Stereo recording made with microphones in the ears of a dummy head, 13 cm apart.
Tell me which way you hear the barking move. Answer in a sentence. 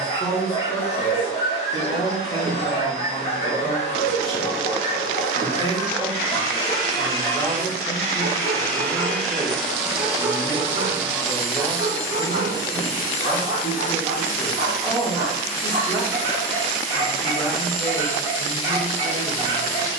In this clip you hear the barking move to the right.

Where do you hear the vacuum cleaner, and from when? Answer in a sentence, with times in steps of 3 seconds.
You can hear the vacuum cleaner on the left from 0 s, in the centre from 9 s and on the left from 12 s.